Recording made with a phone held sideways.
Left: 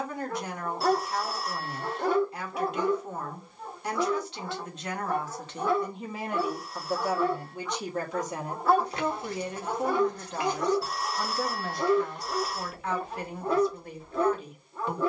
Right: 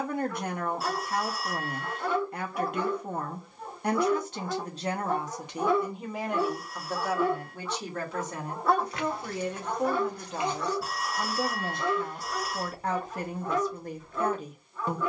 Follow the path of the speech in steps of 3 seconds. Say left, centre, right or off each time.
right, right, centre, centre, right.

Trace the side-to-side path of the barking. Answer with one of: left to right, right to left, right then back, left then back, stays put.
right then back.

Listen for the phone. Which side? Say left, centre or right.
centre.